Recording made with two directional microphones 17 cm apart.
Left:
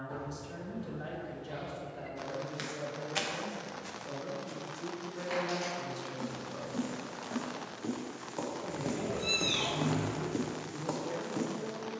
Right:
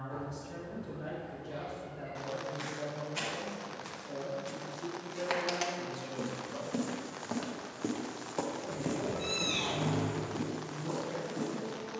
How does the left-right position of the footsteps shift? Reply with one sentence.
In this clip you hear the footsteps move from left to right and back again.